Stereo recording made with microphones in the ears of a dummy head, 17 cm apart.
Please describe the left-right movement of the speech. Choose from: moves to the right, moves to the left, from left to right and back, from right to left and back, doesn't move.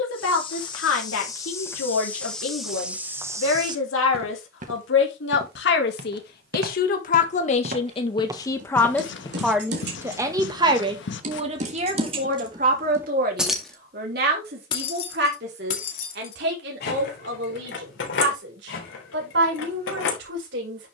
moves to the right.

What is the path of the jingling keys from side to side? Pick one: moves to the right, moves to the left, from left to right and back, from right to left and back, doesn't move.
moves to the left.